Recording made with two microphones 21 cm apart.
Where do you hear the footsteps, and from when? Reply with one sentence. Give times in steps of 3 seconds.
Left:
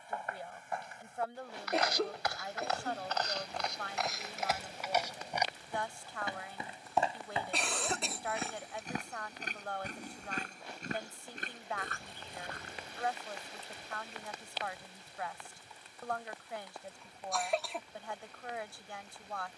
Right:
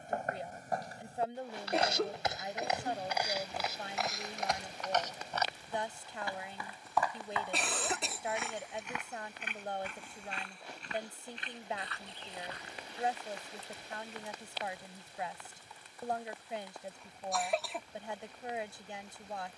You can hear the footsteps on the right from 0 s, in the centre from 3 s, on the left from 6 s and not at all from 15 s.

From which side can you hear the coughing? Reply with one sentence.
In this clip you hear the coughing in the centre.